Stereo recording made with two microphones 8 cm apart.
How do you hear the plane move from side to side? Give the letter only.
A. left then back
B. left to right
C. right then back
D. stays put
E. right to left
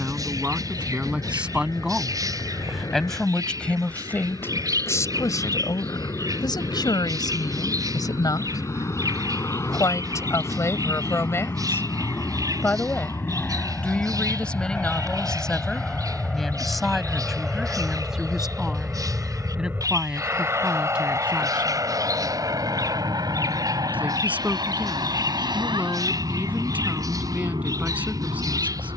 B.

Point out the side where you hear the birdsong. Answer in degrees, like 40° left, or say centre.
50° right.